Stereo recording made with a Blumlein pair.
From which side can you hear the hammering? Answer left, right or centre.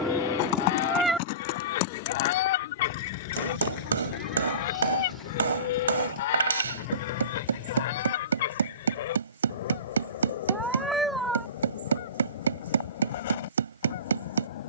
right.